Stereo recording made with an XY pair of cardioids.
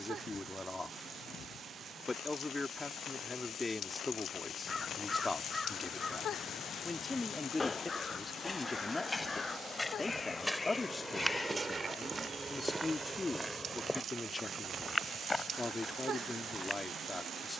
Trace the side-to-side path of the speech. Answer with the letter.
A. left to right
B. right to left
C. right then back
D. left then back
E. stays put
E.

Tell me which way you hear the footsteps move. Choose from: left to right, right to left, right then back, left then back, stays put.
right then back.